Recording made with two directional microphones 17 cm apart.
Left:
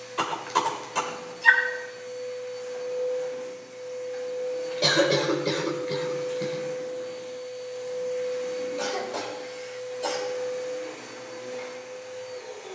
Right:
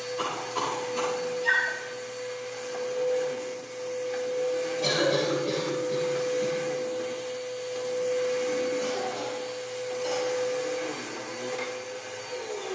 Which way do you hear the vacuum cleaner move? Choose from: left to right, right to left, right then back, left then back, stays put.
stays put.